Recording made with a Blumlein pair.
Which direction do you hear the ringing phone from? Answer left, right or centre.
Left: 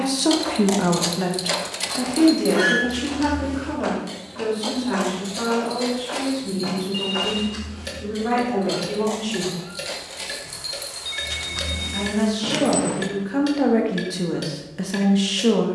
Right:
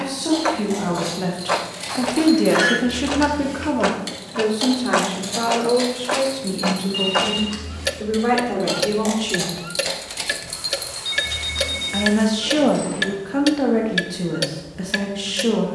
centre.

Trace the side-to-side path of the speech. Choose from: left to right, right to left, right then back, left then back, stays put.
right then back.